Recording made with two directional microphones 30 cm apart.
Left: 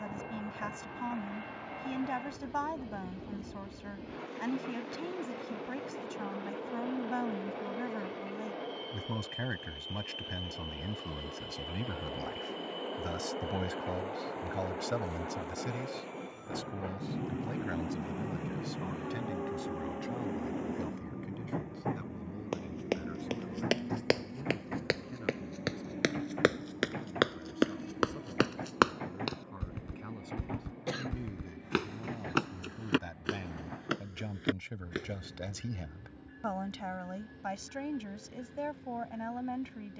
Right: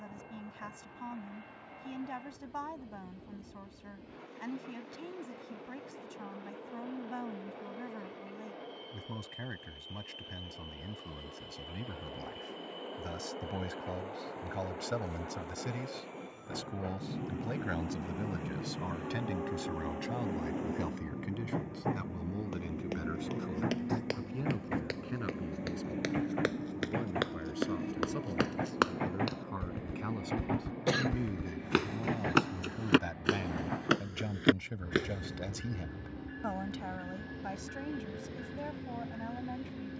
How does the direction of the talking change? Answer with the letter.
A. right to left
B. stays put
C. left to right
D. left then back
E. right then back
E.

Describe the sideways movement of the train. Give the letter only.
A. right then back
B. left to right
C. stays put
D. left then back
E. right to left
B.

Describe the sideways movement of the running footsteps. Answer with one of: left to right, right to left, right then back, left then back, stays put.
left to right.